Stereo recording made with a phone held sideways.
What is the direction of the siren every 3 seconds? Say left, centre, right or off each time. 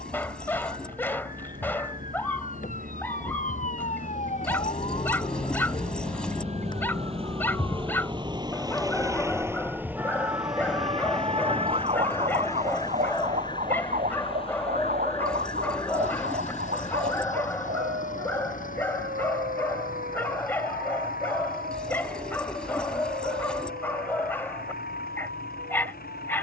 left, left, left, right, right, right, right, right, right.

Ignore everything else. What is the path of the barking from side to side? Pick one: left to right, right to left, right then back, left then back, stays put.
stays put.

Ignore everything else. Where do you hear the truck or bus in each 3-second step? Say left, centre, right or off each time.
right, right, right, centre, left, left, left, left, left.